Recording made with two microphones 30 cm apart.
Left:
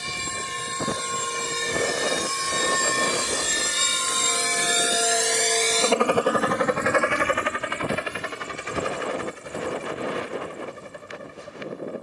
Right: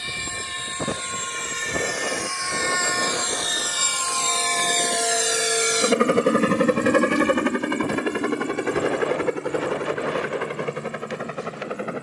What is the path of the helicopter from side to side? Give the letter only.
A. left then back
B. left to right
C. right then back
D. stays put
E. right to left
B.